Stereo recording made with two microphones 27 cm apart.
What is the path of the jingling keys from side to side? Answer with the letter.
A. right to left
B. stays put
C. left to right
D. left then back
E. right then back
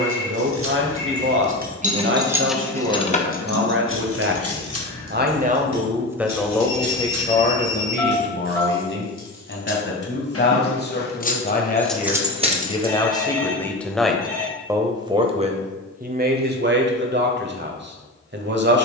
D.